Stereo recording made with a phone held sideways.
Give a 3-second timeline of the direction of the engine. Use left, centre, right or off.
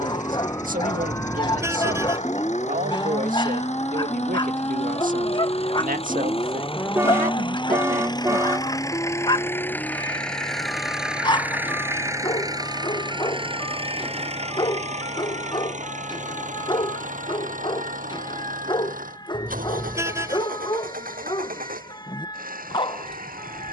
left, left, left, centre, right, right, right, right.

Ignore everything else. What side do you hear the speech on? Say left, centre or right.
right.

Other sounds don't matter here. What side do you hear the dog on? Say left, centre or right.
left.